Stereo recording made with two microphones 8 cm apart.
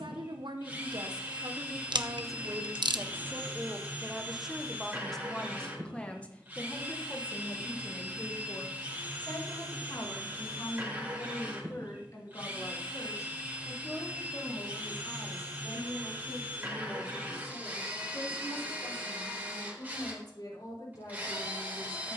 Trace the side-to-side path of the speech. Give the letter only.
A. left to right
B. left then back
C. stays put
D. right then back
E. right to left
E.